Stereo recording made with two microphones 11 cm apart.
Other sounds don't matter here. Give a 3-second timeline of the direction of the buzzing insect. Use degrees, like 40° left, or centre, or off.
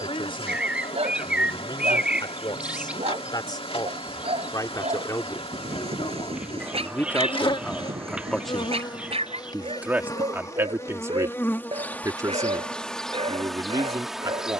70° left, 70° left, 60° left, 30° left, centre.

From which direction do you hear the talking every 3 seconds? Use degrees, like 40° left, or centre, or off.
50° left, 40° left, 10° left, 20° right, 30° right.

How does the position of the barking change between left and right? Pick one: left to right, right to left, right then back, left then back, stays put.
stays put.